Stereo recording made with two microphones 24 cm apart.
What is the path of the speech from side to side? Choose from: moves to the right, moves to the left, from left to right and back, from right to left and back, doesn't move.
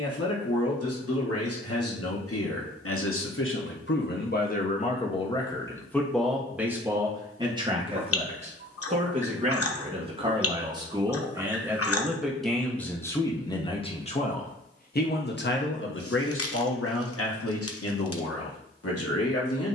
from left to right and back.